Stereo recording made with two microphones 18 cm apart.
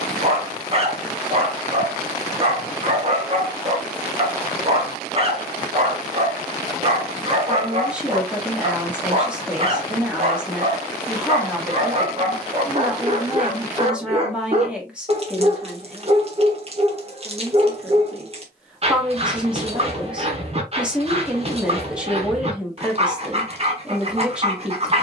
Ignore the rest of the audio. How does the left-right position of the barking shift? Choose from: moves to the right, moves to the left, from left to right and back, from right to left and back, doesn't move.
doesn't move.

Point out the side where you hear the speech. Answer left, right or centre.
centre.